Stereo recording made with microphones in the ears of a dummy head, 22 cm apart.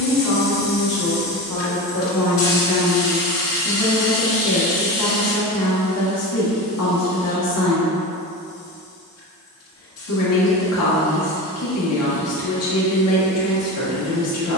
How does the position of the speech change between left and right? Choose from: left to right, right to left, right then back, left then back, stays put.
stays put.